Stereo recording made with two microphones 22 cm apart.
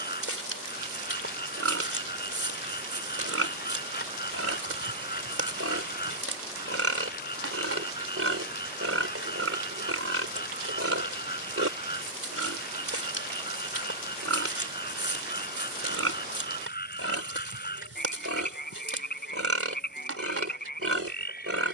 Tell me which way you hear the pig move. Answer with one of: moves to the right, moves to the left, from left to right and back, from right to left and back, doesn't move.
doesn't move.